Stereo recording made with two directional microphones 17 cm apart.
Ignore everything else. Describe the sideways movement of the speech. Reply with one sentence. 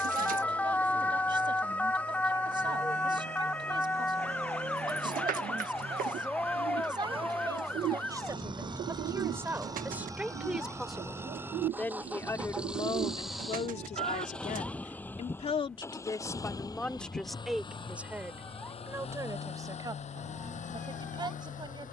In this clip you hear the speech move from right to left and back again.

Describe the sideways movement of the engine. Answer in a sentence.
In this clip you hear the engine go from the right side to the left.